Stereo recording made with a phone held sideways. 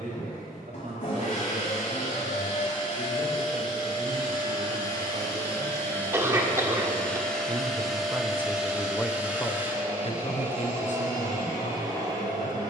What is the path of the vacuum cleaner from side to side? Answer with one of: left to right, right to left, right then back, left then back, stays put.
left to right.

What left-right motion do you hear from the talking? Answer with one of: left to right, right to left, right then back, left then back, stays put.
right to left.